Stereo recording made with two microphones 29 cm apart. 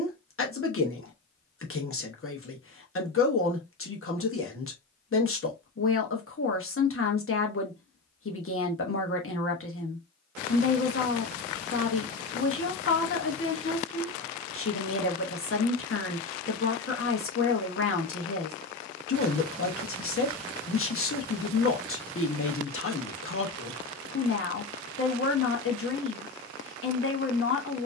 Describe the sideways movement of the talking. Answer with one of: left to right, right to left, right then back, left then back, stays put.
stays put.